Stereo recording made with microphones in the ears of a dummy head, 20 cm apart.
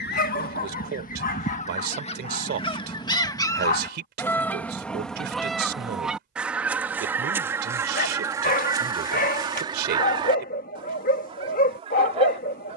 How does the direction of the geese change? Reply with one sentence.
In this clip you hear the geese move from left to right.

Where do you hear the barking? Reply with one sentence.
You can hear the barking on the left.